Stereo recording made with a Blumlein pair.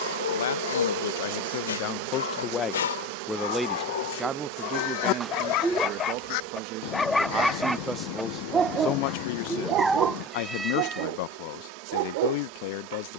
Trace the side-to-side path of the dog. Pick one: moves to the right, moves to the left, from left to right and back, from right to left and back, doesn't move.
moves to the right.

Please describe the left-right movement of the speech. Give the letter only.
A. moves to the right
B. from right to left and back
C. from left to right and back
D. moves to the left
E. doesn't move
C.